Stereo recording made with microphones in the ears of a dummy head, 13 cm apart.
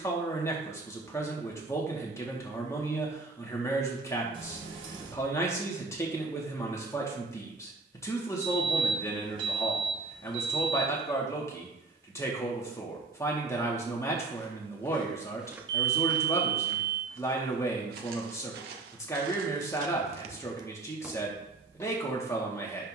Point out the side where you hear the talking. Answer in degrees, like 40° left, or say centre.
20° left.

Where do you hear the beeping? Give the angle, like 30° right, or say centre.
40° right.